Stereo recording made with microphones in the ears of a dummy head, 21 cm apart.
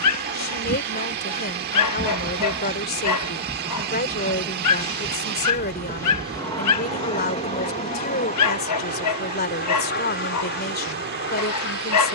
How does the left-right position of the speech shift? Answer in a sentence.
You can hear the speech stay in one place.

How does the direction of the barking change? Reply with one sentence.
In this clip you hear the barking stay in one place.